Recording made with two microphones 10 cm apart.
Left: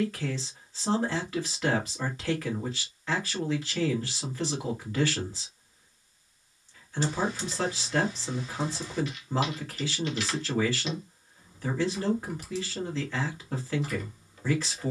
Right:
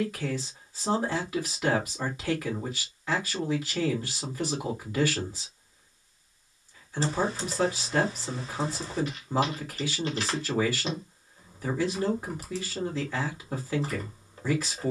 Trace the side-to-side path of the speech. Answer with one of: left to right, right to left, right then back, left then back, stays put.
stays put.